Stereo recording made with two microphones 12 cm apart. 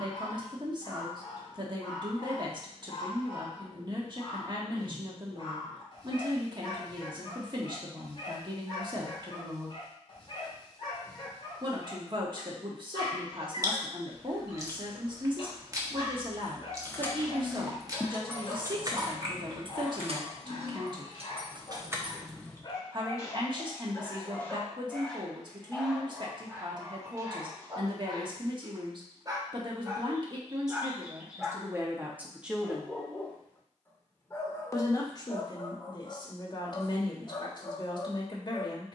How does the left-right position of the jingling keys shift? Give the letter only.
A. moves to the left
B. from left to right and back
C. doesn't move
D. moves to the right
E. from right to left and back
B.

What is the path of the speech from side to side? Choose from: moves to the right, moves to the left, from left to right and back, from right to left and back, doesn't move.
moves to the left.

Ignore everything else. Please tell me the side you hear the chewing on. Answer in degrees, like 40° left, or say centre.
30° right.